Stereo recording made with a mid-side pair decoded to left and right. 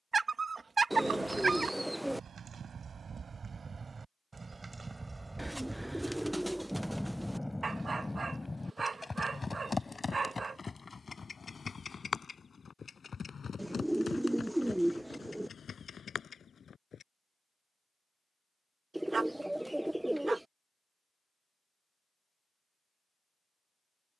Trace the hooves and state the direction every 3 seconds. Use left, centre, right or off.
right, right, centre, left, left, left, off, off.